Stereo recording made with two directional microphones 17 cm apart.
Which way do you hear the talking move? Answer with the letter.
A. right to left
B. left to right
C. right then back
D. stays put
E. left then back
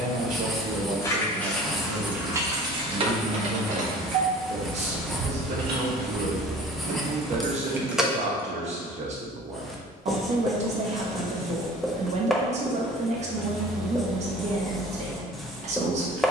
D.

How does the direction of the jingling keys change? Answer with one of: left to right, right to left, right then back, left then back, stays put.
right then back.